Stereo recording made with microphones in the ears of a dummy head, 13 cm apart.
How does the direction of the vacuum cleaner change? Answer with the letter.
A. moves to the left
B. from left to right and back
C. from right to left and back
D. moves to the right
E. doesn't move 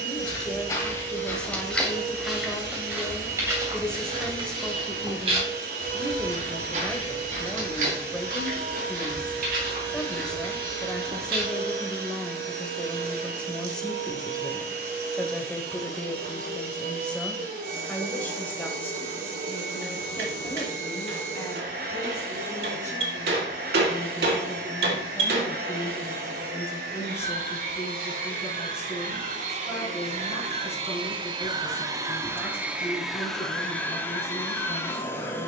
A.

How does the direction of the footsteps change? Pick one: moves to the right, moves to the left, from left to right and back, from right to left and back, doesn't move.
moves to the right.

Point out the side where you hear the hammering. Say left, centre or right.
right.